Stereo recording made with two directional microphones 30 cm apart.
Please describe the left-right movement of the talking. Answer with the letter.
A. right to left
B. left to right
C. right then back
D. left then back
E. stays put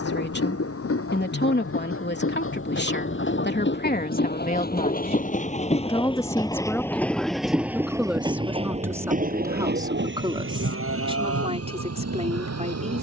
B.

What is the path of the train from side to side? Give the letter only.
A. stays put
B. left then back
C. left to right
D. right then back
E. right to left
C.